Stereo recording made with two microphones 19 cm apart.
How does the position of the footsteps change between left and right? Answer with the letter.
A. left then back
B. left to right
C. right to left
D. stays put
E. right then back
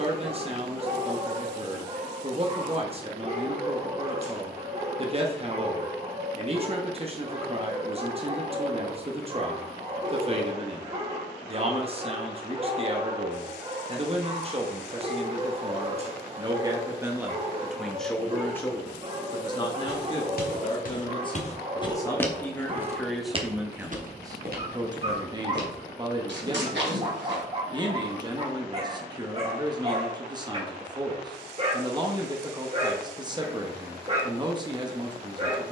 B.